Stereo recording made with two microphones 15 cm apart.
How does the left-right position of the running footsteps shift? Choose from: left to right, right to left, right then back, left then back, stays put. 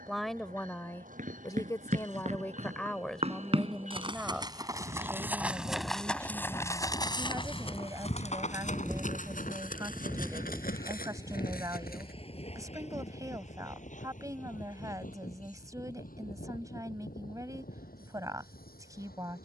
right to left.